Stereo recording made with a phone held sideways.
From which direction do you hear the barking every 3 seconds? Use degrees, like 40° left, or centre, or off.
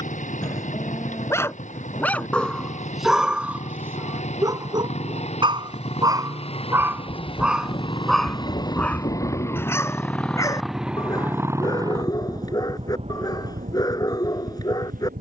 10° left, 20° right, 10° right, 20° left, 30° left.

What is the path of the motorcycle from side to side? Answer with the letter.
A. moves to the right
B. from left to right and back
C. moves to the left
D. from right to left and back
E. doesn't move
A.